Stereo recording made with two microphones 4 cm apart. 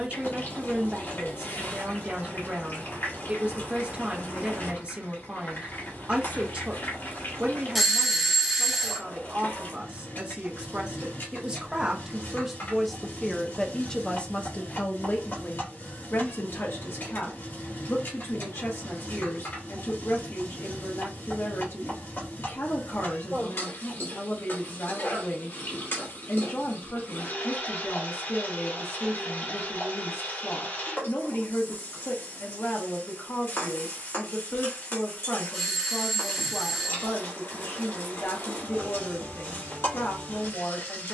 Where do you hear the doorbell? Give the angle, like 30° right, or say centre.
centre.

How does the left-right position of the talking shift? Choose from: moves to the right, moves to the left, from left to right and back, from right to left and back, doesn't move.
moves to the left.